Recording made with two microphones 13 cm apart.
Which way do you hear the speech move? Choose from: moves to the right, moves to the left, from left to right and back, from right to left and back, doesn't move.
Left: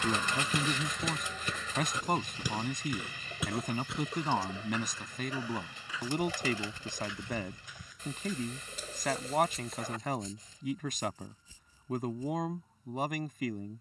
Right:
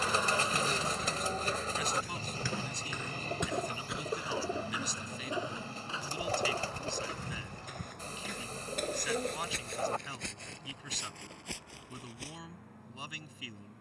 doesn't move.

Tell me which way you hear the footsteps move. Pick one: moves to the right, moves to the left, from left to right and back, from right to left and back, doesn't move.
moves to the right.